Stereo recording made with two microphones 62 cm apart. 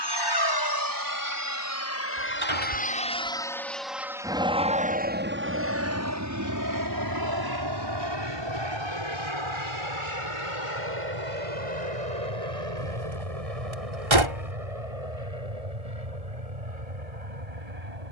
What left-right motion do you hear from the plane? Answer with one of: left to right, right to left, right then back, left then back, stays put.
left to right.